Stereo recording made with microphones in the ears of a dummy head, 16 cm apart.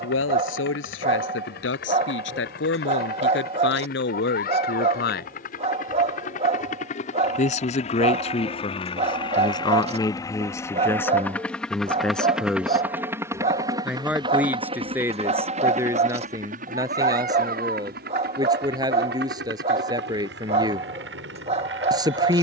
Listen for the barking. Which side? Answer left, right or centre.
right.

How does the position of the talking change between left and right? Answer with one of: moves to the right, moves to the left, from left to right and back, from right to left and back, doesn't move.
moves to the right.